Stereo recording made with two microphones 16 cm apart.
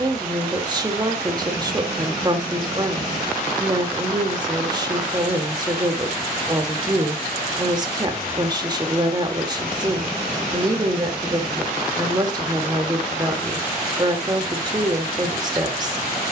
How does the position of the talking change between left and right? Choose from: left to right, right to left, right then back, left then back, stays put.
stays put.